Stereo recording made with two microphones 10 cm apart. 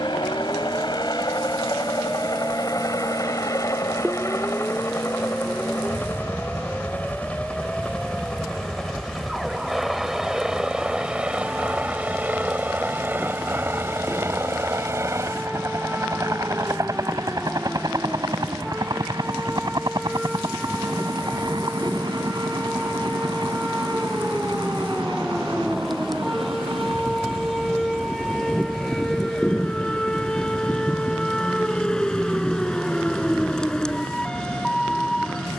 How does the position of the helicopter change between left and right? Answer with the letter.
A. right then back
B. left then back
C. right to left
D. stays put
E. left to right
E.